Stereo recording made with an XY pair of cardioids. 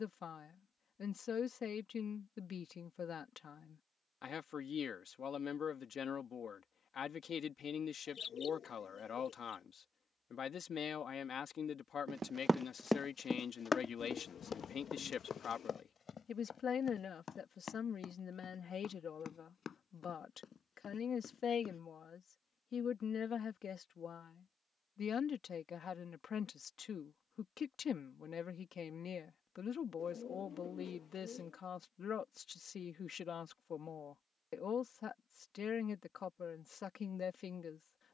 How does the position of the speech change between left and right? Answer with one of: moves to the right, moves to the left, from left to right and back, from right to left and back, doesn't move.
doesn't move.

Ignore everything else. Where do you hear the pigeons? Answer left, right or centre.
left.